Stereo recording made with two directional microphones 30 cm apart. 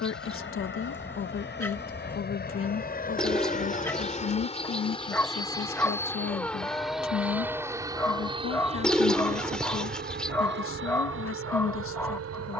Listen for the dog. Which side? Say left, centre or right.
centre.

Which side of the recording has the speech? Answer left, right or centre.
left.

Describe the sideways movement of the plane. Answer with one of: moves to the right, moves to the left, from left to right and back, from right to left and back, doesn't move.
moves to the right.